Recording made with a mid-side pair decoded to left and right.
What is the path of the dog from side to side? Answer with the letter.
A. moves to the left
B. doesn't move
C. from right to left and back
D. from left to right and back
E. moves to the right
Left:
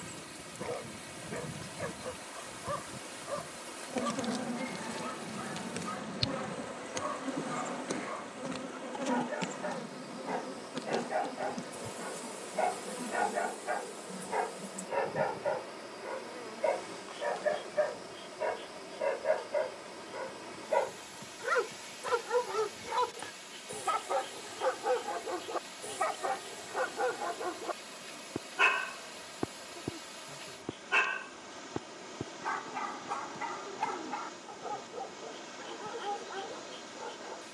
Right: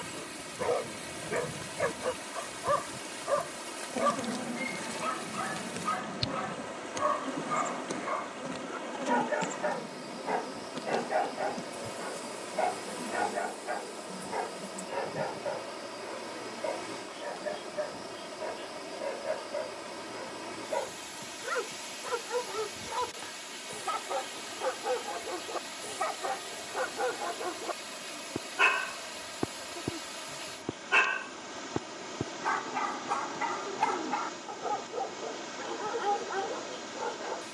C.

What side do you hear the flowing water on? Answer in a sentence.
In this clip you hear the flowing water on the right.